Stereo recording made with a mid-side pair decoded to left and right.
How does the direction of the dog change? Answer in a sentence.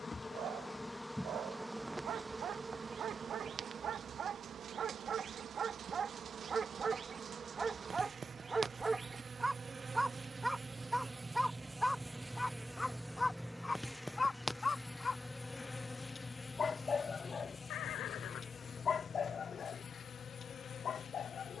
You can hear the dog go from the right side to the left.